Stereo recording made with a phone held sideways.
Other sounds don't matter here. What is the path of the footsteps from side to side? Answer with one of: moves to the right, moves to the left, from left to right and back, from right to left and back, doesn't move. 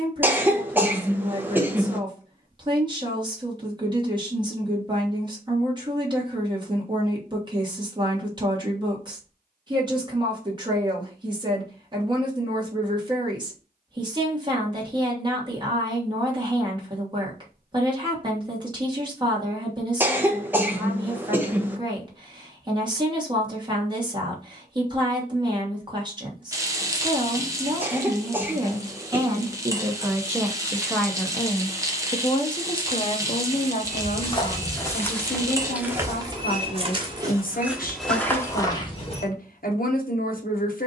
from left to right and back.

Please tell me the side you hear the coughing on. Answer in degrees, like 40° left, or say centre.
10° right.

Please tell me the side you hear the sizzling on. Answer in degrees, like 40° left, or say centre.
20° right.